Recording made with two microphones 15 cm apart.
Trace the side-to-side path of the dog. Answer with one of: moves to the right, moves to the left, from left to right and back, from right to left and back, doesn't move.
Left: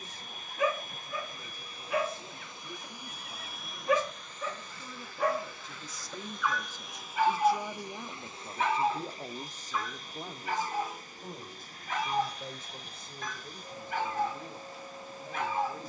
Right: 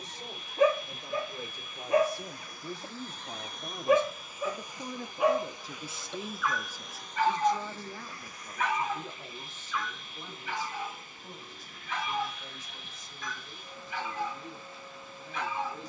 moves to the left.